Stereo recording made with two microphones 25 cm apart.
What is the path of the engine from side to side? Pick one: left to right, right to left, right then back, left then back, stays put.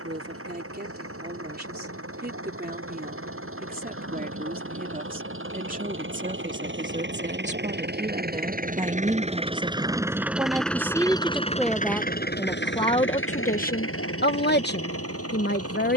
right to left.